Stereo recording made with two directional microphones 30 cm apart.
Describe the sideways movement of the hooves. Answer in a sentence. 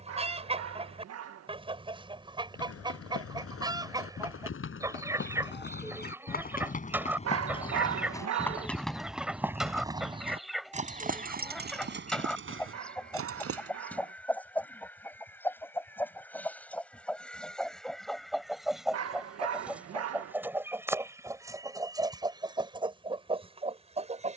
In this clip you hear the hooves move to the right.